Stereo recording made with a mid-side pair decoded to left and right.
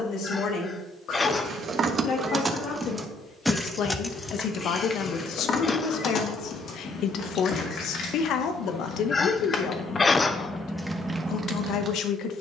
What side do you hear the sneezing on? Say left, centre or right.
left.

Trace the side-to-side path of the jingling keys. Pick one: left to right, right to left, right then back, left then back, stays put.
left then back.